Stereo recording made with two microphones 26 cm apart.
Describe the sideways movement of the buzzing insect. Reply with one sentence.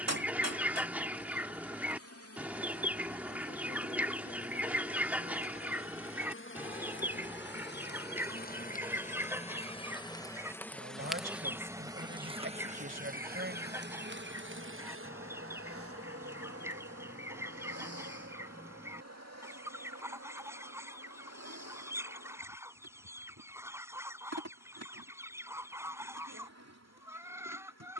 In this clip you hear the buzzing insect go from the left side to the right.